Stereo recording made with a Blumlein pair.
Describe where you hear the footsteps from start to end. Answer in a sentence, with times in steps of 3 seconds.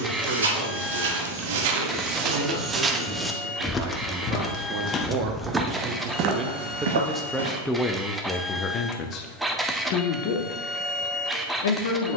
In this clip you hear the footsteps on the right from 0 s, in the centre from 3 s, on the right from 6 s and not at all from 9 s.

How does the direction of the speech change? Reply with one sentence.
In this clip you hear the speech go from the right side to the left.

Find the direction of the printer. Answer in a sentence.
You can hear the printer in the centre.